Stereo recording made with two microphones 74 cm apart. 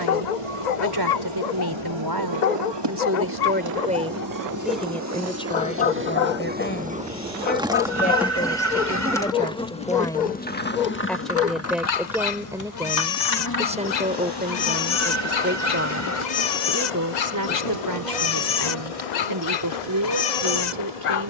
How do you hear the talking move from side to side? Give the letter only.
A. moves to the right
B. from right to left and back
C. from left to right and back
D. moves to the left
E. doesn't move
B.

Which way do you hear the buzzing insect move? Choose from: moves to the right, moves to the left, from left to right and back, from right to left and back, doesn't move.
moves to the left.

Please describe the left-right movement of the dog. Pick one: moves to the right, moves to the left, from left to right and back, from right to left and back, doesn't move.
doesn't move.